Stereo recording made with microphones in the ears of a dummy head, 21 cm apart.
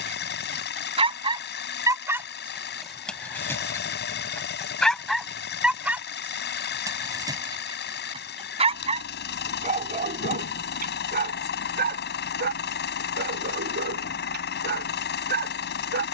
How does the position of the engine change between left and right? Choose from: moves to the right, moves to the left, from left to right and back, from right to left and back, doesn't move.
doesn't move.